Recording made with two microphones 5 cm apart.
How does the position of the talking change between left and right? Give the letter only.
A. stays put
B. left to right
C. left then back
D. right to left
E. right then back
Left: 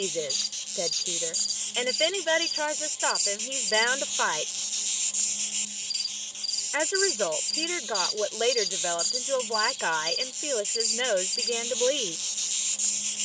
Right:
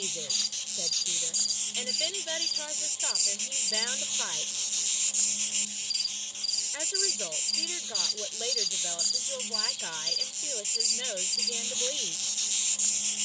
A.